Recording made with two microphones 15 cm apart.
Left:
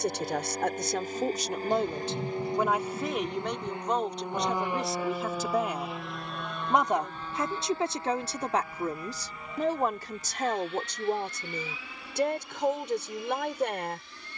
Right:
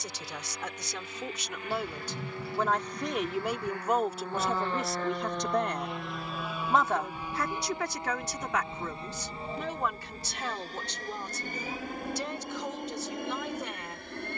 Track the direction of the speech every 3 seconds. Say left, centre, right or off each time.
left, centre, left, left, left.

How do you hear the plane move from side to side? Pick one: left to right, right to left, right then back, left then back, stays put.
left to right.